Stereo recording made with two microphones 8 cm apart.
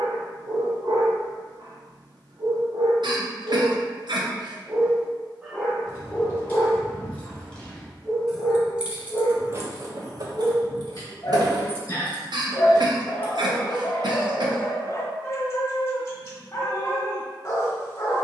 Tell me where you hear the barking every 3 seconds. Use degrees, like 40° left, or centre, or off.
60° right, 20° right, 20° left, 30° left, 30° left, 30° left.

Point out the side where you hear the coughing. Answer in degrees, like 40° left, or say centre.
70° right.